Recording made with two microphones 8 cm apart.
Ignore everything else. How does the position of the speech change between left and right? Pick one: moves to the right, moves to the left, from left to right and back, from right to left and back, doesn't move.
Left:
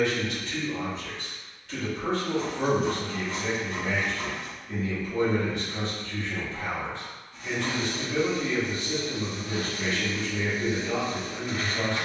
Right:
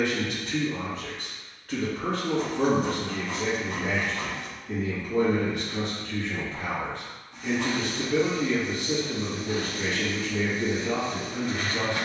doesn't move.